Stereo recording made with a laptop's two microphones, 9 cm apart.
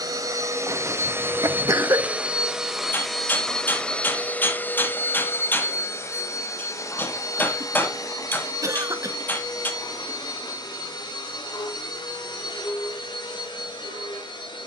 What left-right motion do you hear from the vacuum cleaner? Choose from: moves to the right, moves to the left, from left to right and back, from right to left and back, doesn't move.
moves to the left.